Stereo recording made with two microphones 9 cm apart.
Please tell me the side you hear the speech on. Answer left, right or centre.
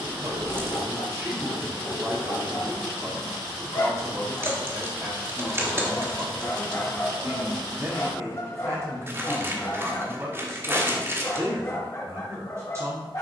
right.